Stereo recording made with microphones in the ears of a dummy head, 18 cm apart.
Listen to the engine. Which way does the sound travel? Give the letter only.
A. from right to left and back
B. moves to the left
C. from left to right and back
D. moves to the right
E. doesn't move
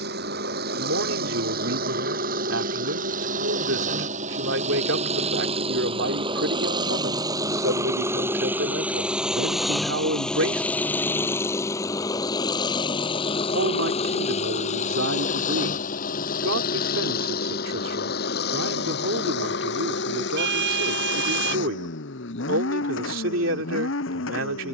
B.